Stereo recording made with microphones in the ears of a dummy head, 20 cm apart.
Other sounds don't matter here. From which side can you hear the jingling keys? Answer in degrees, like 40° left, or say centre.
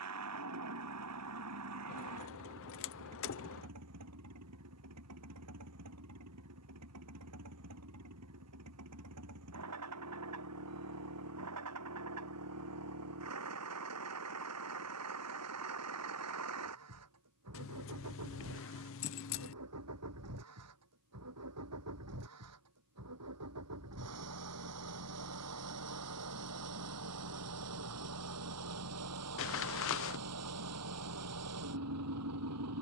60° left.